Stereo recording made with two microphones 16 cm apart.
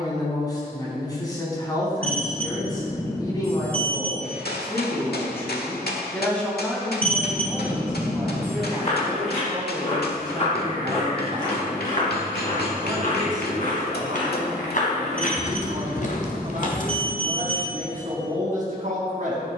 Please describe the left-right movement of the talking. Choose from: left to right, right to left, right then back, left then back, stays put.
left to right.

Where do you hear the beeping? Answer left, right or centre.
centre.